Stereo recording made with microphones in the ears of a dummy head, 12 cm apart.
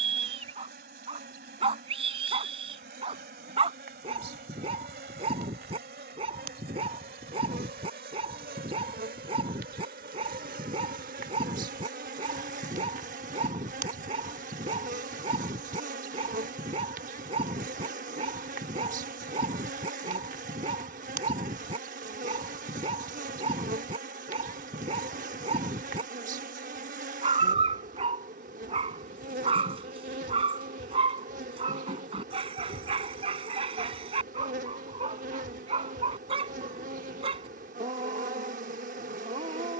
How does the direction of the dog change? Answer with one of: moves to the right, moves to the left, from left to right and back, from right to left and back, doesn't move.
doesn't move.